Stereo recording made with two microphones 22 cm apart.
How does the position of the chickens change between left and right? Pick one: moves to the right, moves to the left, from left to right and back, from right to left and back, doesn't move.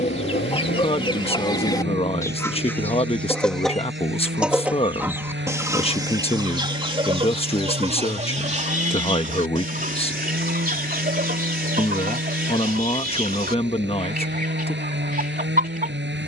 moves to the right.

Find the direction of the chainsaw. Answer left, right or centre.
right.